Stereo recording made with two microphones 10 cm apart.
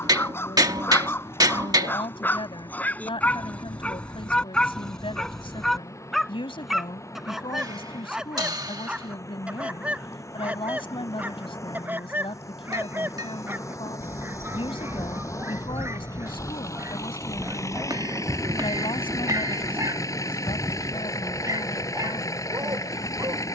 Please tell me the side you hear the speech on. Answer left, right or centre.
left.